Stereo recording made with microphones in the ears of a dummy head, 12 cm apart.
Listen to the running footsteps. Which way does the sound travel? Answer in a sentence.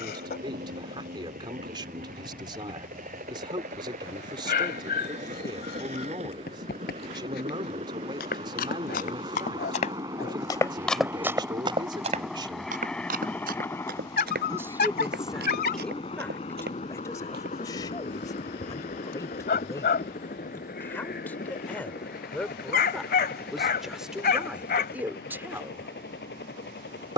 You can hear the running footsteps move from left to right.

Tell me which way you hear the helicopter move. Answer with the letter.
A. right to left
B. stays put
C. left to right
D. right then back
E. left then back
A.